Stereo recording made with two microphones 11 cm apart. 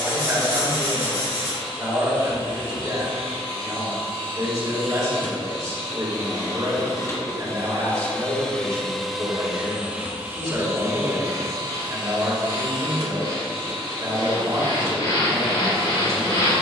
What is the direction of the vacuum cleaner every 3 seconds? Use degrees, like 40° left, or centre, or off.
60° left, 50° left, 20° left, 20° right, 50° right, 50° right.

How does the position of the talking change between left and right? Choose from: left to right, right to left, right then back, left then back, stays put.
stays put.